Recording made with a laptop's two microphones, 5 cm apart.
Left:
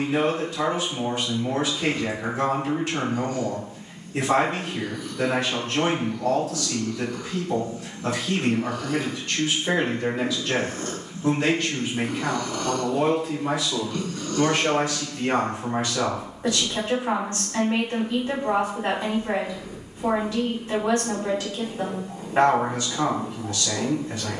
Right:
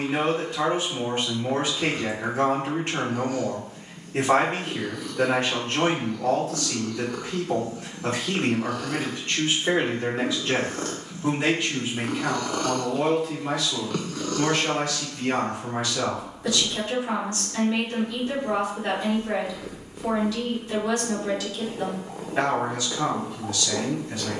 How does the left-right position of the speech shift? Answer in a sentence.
You can hear the speech travel towards the left.